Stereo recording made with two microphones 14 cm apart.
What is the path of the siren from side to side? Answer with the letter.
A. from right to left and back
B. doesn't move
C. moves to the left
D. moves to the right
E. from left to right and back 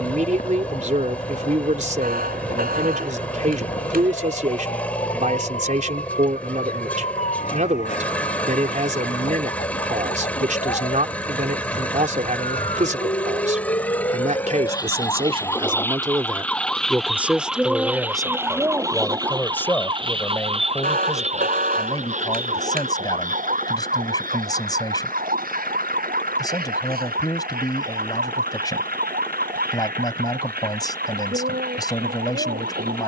D.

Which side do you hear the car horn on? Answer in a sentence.
You can hear the car horn on the right.